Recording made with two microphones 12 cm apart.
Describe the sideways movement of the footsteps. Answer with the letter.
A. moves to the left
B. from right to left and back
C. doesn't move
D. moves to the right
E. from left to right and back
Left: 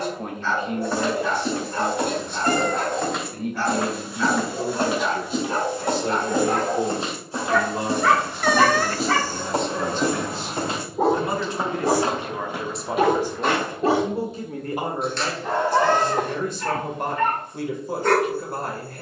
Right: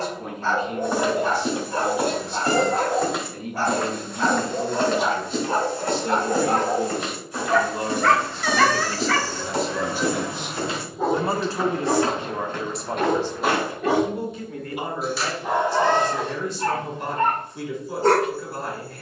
B.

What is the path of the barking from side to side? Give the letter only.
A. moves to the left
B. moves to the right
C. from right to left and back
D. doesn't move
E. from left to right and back
C.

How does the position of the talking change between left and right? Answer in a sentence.
In this clip you hear the talking move from left to right and back again.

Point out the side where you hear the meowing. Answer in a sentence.
You can hear the meowing on the left.